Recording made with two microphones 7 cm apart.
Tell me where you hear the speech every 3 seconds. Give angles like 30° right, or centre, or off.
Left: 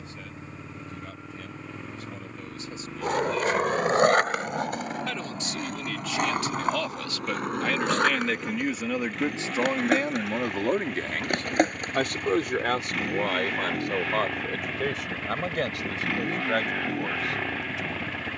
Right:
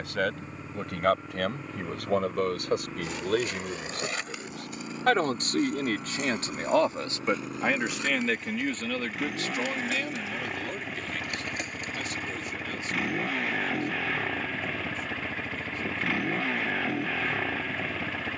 70° right, 50° right, 20° right, 40° left, 70° left, 80° left.